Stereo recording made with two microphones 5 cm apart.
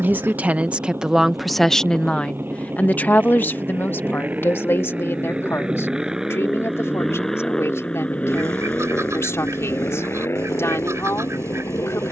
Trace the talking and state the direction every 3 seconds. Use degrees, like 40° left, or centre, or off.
centre, 50° left, 60° left, 70° left.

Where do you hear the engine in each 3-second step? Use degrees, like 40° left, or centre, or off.
50° right, 30° right, 10° left, 60° left.